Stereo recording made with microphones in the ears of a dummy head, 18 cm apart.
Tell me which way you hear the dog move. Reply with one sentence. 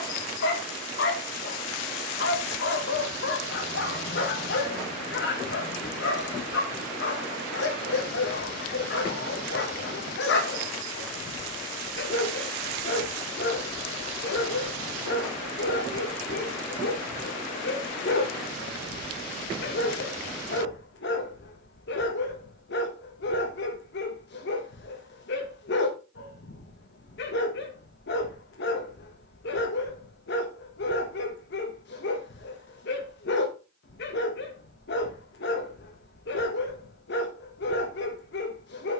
In this clip you hear the dog stay put.